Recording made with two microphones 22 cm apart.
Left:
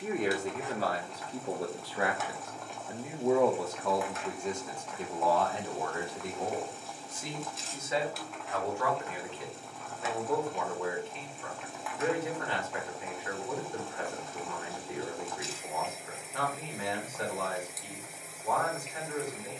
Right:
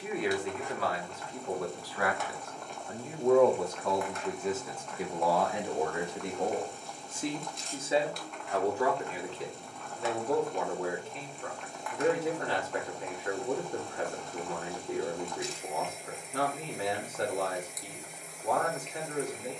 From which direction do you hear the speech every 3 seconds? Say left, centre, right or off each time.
left, centre, right, right, right, right, right.